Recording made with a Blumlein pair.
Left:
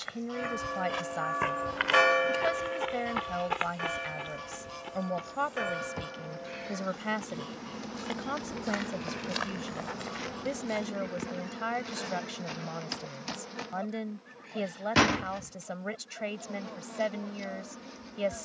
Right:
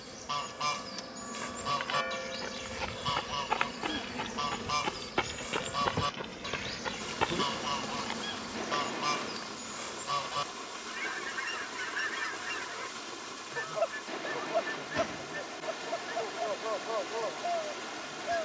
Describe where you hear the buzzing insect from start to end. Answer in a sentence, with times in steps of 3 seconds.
In this clip you hear the buzzing insect on the right from 0 s, in the centre from 6 s and on the left from 9 s.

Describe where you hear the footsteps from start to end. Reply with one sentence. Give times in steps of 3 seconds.
You can hear the footsteps on the left from 0 s, on the right from 3 s, on the left from 9 s and not at all from 12 s.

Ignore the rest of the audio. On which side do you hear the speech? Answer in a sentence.
In this clip you hear the speech on the left.